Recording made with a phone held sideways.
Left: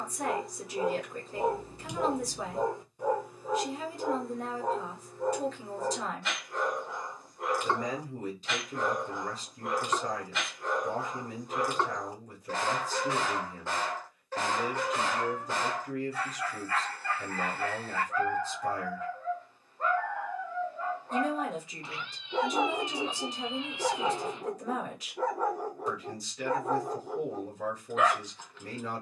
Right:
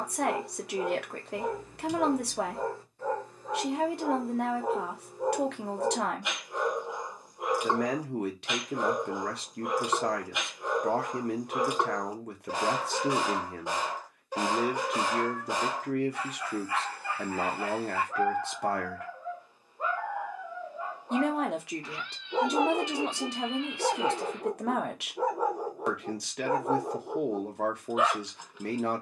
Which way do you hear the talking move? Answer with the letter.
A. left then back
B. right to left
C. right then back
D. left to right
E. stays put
E.